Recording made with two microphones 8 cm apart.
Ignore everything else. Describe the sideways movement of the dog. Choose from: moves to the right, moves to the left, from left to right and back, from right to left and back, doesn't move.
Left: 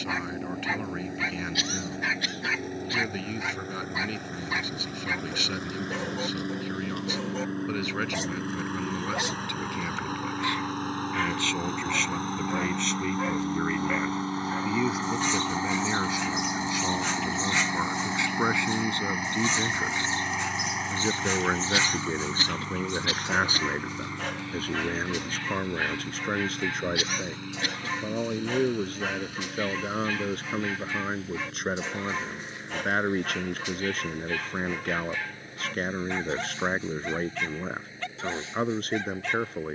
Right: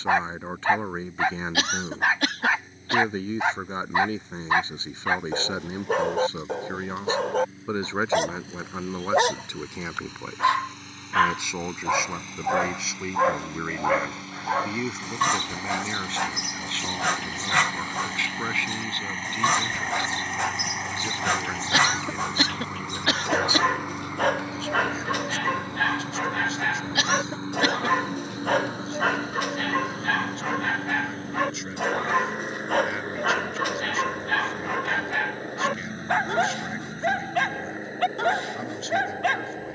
doesn't move.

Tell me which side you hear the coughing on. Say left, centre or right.
right.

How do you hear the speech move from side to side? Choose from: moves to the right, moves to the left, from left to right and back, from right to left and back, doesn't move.
moves to the left.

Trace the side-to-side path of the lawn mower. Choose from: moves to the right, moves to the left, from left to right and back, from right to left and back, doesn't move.
moves to the right.